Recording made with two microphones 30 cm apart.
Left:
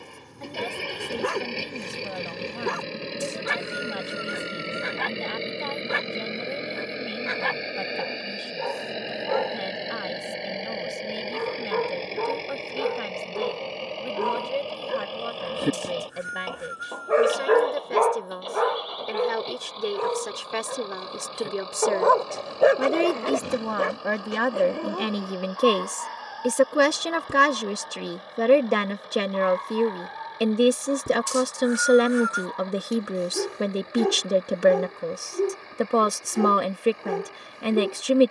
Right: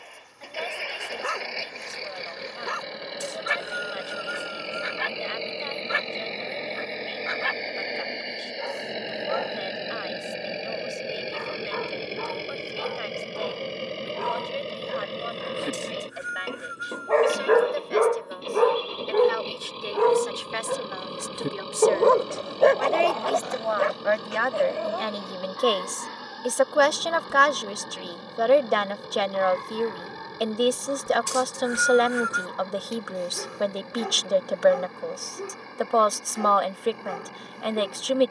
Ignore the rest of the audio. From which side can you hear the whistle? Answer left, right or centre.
right.